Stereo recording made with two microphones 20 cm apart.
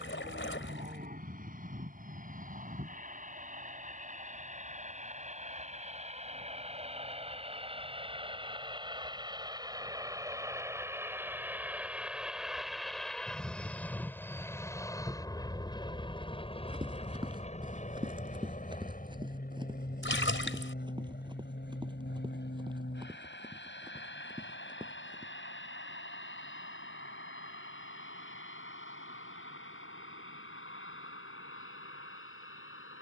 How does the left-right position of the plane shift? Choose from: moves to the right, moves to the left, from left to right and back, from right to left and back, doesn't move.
moves to the left.